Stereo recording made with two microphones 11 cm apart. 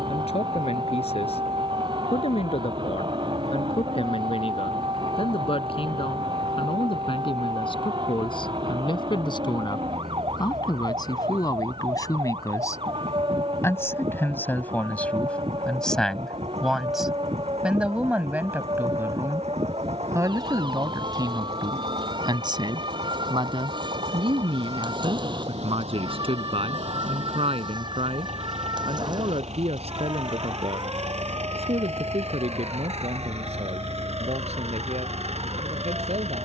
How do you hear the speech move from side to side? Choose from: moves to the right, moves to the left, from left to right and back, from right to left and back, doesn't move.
moves to the right.